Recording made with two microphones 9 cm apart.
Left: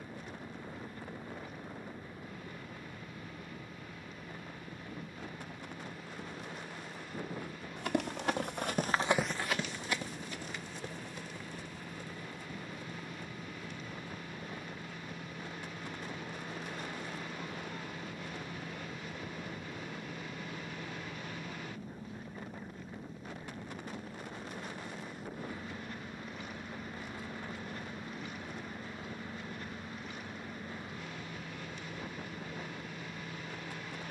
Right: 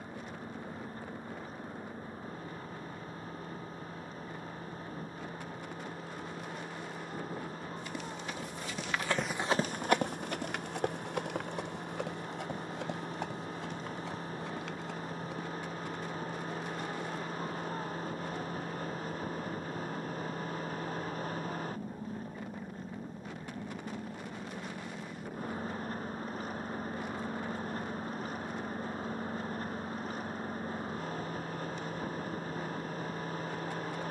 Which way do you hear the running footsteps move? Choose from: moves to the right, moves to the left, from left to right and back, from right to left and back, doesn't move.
moves to the right.